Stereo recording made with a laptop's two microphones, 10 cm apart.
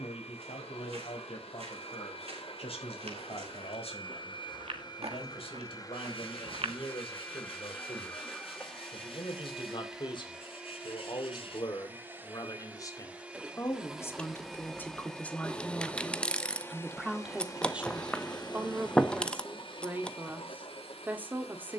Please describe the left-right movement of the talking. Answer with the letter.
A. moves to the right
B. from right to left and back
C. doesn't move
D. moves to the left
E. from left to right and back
A.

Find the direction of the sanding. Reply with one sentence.
In this clip you hear the sanding on the left.